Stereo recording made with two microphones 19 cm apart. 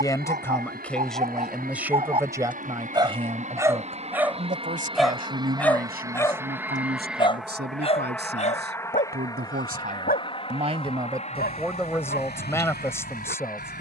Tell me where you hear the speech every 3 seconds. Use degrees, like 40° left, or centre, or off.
centre, 40° right, 60° right, 30° right, 10° left.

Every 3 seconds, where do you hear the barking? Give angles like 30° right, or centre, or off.
40° right, 10° right, 30° left, 50° left, 60° left.